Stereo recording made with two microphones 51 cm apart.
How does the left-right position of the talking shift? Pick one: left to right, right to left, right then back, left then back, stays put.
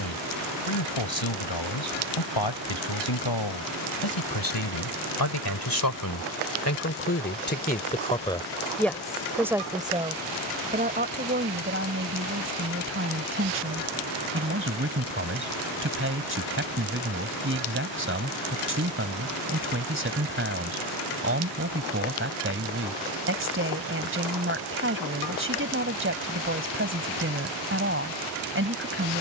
left to right.